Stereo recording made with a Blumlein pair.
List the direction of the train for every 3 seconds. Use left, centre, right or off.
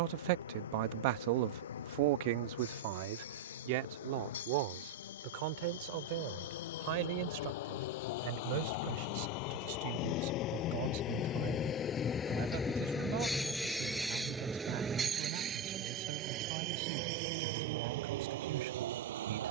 left, left, left, left, centre, right, right.